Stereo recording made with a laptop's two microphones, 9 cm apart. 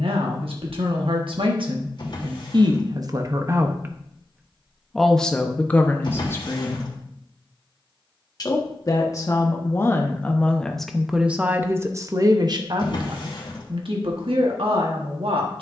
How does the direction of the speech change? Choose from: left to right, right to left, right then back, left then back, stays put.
left then back.